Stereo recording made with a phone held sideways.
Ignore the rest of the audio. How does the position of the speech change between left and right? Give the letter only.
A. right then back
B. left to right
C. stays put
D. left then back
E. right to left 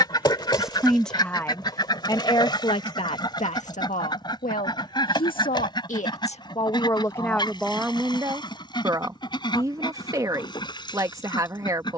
D.